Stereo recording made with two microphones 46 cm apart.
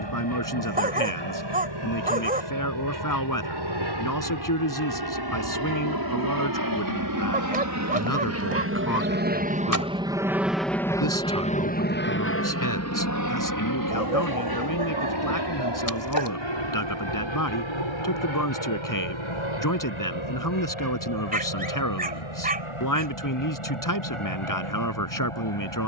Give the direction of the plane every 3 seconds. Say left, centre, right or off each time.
right, right, right, centre, left, left, left, left, left.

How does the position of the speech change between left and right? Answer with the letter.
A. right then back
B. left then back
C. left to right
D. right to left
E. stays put
E.